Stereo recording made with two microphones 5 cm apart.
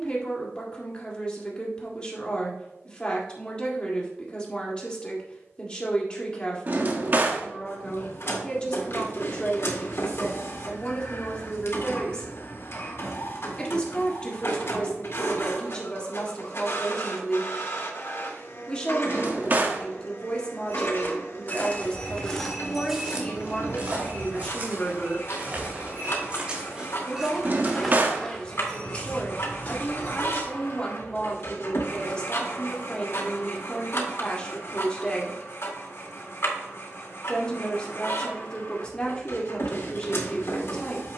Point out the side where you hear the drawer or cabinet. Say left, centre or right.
right.